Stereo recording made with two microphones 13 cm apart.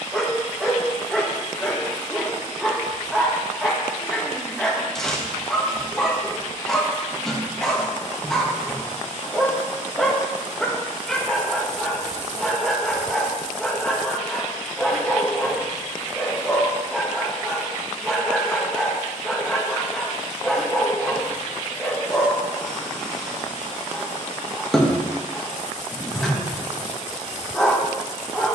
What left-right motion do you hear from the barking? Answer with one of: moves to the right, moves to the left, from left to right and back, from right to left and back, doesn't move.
doesn't move.